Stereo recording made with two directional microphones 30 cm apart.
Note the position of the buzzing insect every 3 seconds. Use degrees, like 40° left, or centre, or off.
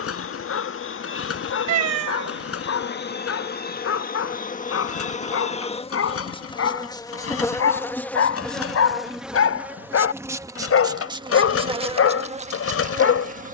40° left, 30° left, 10° left, 10° right, 20° right.